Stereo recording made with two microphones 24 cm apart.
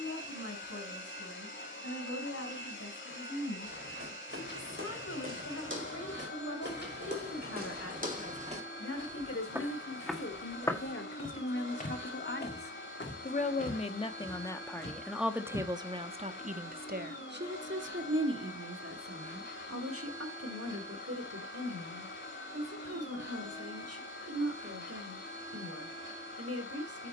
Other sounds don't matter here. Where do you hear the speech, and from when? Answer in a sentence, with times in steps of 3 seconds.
In this clip you hear the speech on the left from 0 s and on the right from 15 s.